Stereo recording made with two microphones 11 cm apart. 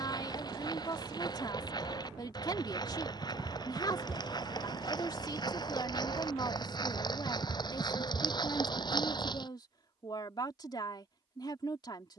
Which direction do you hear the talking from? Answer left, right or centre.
left.